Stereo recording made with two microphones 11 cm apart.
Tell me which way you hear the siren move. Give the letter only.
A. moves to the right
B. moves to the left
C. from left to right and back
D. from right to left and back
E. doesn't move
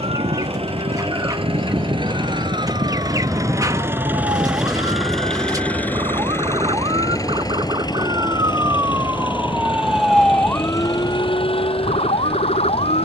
B.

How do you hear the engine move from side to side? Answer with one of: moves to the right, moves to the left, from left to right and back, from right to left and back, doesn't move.
moves to the left.